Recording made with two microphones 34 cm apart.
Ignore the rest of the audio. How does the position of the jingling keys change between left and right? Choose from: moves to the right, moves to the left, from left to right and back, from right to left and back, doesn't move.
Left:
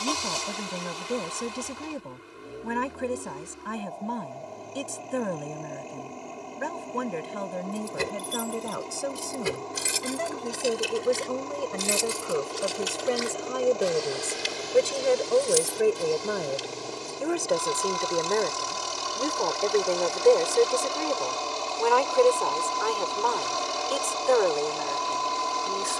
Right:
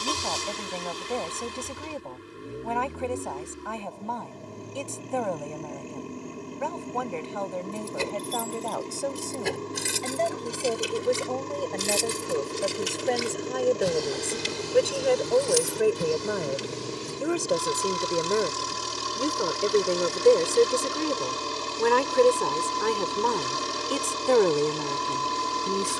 moves to the right.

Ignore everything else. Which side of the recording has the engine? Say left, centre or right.
right.